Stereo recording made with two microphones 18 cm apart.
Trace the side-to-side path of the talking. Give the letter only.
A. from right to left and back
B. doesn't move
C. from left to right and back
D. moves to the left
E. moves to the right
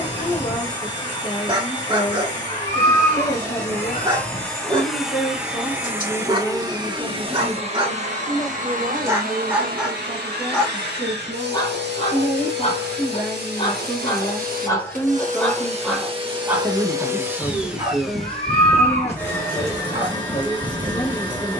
C.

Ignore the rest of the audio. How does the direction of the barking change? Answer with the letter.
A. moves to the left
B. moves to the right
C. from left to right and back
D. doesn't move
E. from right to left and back
E.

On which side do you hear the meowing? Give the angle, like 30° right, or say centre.
40° left.